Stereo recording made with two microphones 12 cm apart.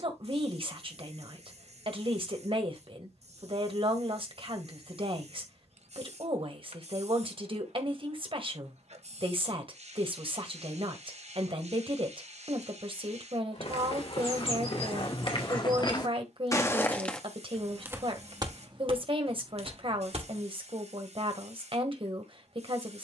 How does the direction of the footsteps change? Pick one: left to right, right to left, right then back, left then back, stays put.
left to right.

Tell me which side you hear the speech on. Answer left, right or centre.
right.